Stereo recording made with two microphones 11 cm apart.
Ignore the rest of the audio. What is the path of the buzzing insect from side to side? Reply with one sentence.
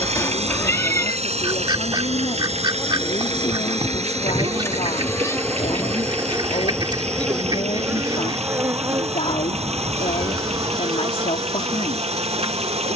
In this clip you hear the buzzing insect move from left to right.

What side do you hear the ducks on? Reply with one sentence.
You can hear the ducks on the right.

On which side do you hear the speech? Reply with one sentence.
In this clip you hear the speech on the left.